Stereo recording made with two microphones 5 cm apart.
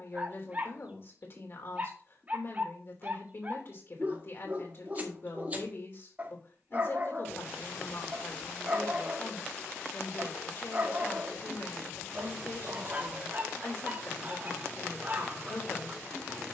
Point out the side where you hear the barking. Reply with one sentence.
You can hear the barking on the right.